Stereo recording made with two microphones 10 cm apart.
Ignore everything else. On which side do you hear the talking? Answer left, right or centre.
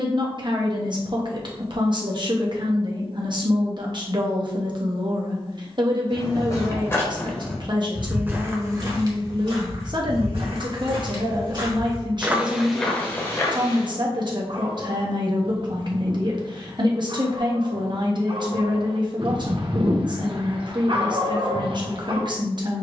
right.